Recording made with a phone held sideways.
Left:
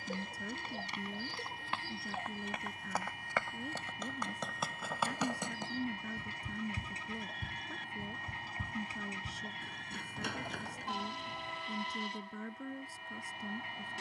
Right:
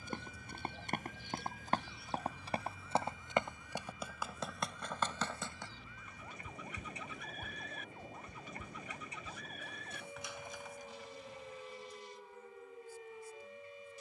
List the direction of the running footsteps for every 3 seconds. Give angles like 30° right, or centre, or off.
40° right, centre, 40° left, 60° left, off.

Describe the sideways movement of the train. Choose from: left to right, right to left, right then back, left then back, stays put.
stays put.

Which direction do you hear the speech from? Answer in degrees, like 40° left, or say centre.
80° left.